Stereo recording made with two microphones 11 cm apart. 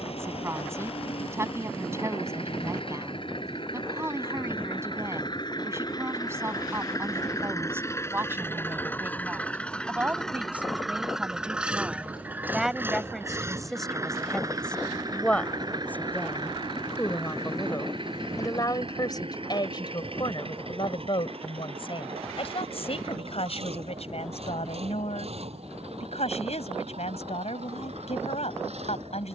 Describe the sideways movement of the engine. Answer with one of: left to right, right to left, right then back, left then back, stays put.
left to right.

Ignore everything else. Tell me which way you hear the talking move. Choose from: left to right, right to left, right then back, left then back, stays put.
right to left.